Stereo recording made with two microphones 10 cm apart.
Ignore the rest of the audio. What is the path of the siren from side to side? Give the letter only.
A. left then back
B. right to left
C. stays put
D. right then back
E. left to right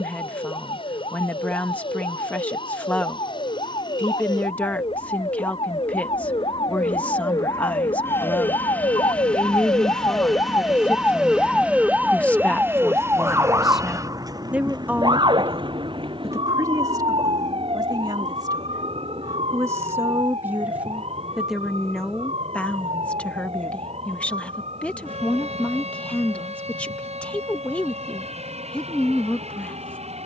E.